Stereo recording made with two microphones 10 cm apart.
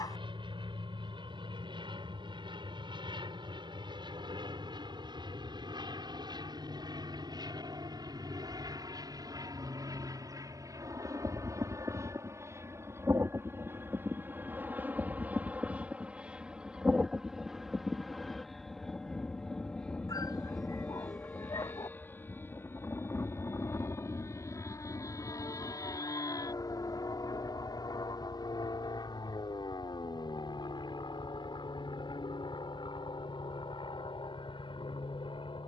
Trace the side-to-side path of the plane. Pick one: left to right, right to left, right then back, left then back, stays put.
right to left.